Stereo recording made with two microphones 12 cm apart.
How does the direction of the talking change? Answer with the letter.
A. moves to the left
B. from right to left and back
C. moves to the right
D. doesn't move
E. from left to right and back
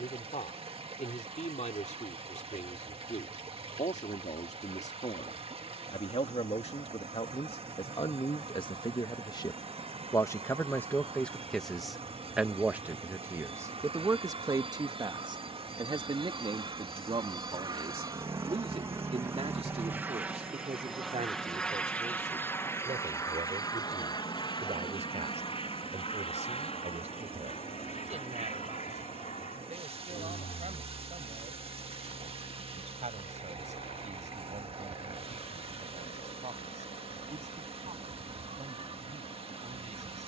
C.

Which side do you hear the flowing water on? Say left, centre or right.
right.